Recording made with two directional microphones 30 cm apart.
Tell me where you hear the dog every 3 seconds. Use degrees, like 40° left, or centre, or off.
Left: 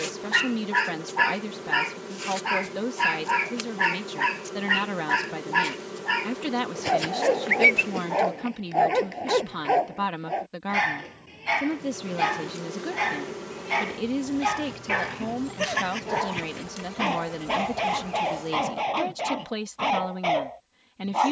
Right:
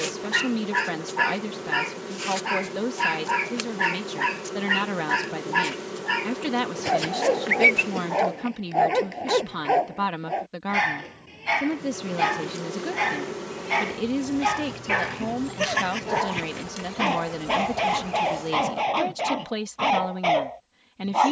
10° left, centre, centre, 10° right, 10° right, 20° right, 20° right.